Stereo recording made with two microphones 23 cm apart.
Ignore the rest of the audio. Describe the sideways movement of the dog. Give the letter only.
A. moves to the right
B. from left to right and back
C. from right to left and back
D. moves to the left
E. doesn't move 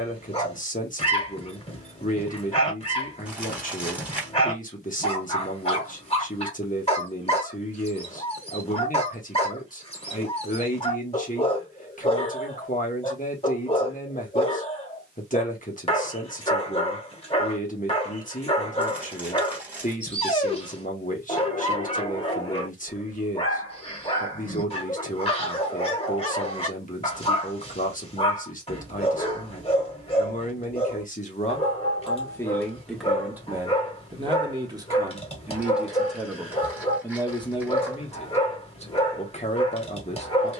E.